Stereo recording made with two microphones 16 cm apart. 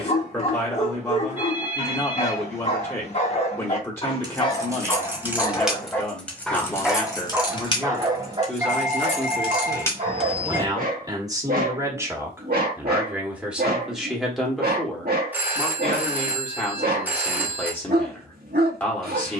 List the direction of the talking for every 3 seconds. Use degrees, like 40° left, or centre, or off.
20° left, 20° left, 10° left, 20° right, centre, 10° left, 10° left.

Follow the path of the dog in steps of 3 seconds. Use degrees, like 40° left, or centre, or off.
40° left, 30° left, 20° right, 50° right, 70° right, 70° right, 70° right.